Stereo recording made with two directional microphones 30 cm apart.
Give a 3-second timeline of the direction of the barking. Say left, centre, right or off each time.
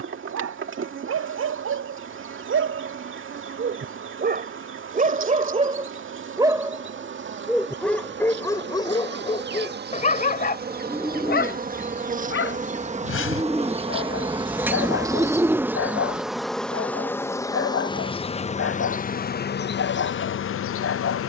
right, right, centre, left, left, left, left.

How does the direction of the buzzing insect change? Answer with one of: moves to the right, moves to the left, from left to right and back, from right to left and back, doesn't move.
moves to the left.